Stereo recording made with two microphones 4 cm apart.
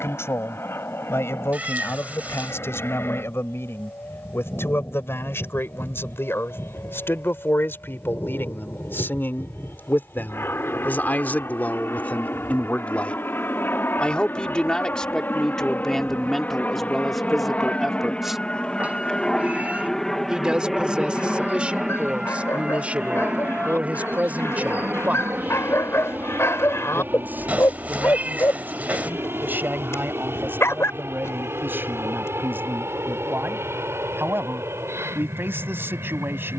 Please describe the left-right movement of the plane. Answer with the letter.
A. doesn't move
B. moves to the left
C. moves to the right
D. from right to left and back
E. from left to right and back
C.